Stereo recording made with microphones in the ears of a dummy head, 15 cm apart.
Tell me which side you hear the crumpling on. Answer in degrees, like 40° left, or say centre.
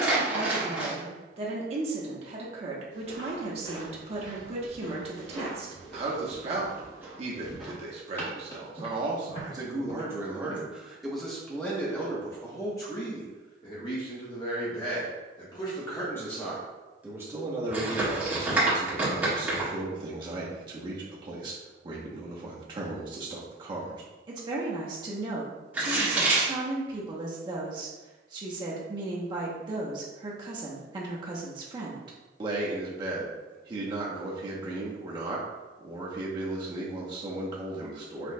10° right.